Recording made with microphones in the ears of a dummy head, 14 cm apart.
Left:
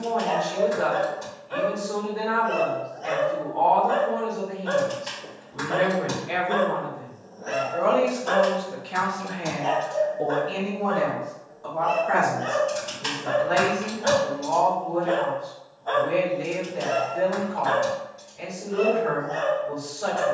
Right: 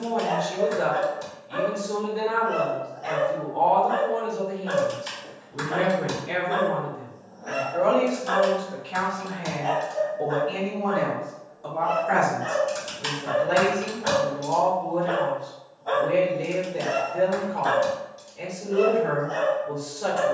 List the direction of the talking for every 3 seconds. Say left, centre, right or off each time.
right, right, centre, centre, right, right, right.